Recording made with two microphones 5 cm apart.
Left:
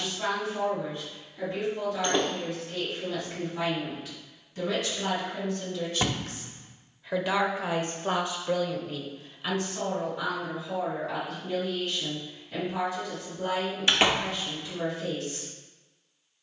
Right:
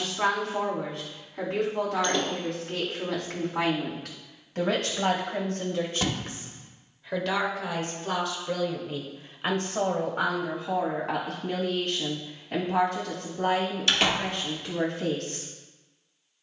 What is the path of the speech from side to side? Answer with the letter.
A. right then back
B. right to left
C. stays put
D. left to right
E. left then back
E.